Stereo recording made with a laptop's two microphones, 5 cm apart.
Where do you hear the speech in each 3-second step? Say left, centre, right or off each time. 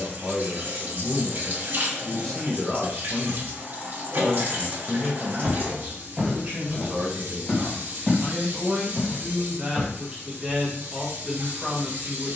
centre, centre, right, centre.